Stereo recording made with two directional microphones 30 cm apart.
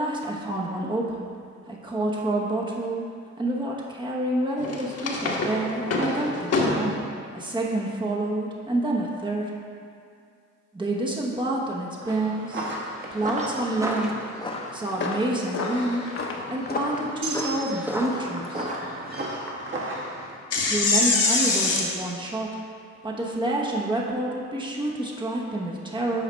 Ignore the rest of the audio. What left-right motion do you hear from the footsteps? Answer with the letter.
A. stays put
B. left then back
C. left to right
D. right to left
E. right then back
B.